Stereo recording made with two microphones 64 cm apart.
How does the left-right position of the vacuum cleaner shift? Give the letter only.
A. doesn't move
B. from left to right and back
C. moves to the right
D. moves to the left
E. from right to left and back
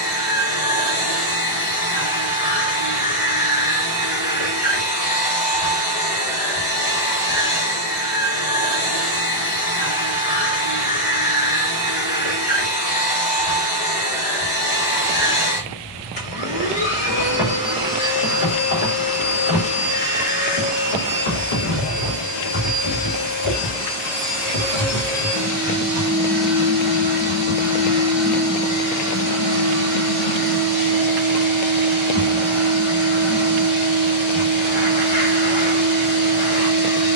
B.